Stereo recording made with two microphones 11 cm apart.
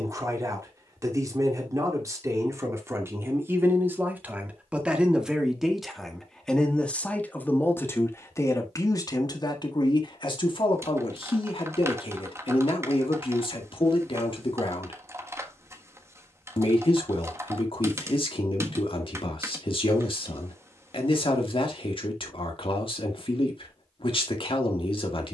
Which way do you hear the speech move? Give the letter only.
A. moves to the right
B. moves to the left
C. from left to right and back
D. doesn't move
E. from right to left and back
B.